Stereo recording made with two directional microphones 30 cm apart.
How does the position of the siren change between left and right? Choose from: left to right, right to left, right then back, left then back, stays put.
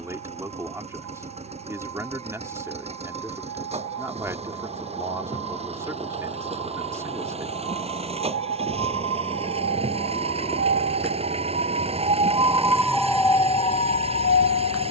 right to left.